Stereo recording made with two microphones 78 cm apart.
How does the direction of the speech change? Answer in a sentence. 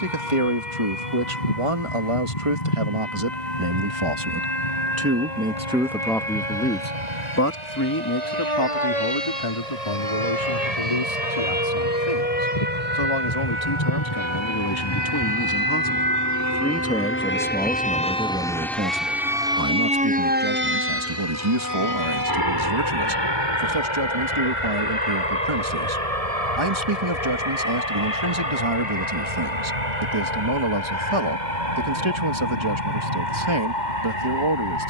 You can hear the speech go left and come back.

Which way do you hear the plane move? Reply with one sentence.
In this clip you hear the plane move from left to right.